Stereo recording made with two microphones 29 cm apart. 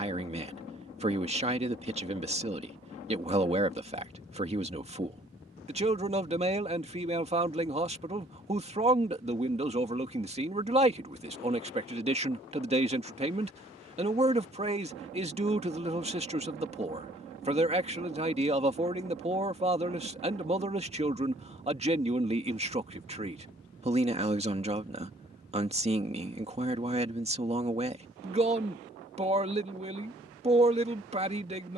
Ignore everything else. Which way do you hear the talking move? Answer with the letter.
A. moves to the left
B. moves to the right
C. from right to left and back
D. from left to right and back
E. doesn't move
E.